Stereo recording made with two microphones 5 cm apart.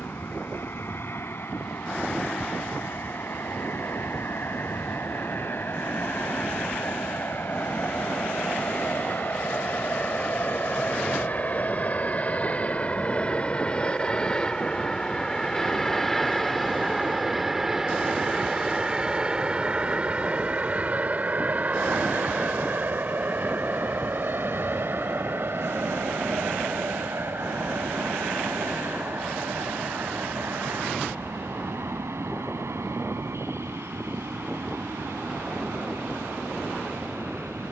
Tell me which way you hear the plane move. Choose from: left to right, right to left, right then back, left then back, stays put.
left to right.